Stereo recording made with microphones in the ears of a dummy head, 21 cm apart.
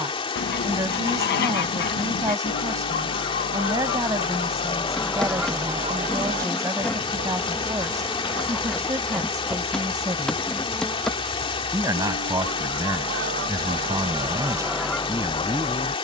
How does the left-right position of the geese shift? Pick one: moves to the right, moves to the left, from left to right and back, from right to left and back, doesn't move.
from left to right and back.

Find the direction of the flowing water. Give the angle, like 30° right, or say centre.
20° left.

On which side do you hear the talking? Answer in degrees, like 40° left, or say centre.
10° right.